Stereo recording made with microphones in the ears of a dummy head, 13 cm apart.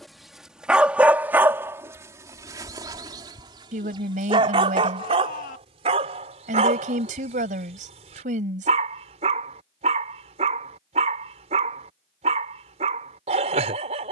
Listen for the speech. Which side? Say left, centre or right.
right.